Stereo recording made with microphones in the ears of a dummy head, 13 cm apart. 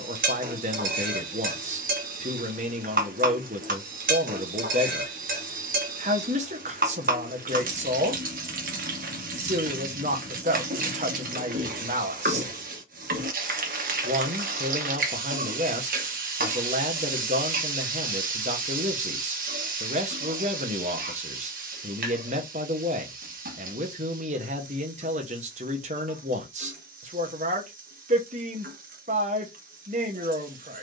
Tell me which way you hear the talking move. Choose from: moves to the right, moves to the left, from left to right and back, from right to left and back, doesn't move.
doesn't move.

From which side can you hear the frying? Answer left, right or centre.
right.